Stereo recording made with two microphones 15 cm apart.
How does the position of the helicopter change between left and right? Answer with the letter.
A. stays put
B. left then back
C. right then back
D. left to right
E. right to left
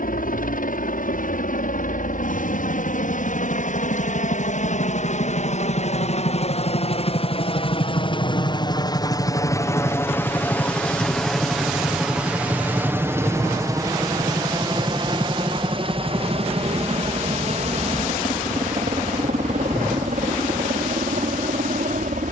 D.